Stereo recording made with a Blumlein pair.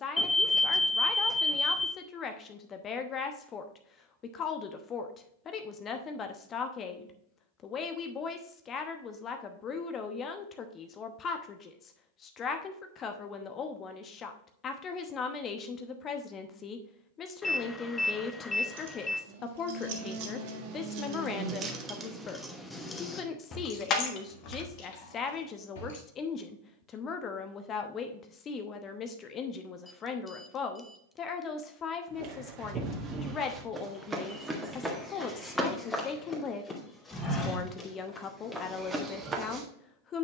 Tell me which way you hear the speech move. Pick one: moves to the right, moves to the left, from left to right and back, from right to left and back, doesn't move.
doesn't move.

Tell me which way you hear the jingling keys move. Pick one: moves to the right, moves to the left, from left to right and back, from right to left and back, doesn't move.
moves to the left.